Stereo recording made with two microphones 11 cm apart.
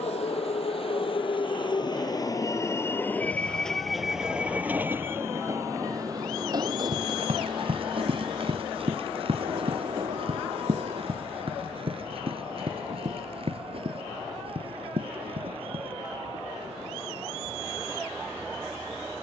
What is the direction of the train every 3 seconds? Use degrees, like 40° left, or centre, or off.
40° left, 10° right, 40° right, 60° right, 60° right, 70° right, 70° right.